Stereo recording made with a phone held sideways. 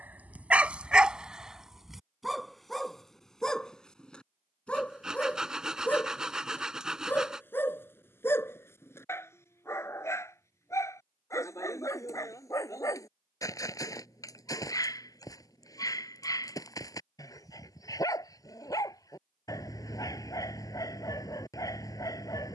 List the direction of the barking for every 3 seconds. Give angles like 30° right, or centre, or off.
10° right, 10° left, 10° left, 20° left, 20° left, 20° left, 20° left, 20° left.